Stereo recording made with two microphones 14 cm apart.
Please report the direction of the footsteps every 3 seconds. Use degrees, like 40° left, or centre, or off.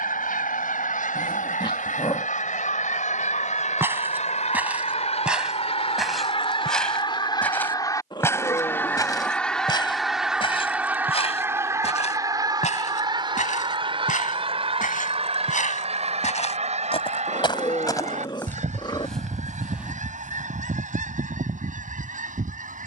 off, 10° right, 10° left, 40° left, 60° left, 50° left, centre, off.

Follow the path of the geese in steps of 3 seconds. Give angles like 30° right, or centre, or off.
70° left, 50° left, 30° left, 10° right, 30° right, 50° right, 60° right, 60° right.